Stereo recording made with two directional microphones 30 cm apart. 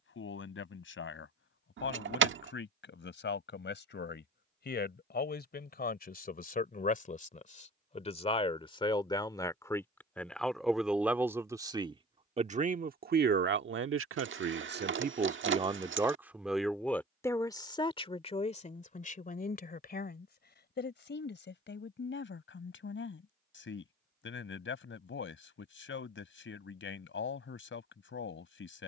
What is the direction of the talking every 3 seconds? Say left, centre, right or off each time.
left, left, left, centre, right, centre, left, left, left, left.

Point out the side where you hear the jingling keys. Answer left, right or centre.
right.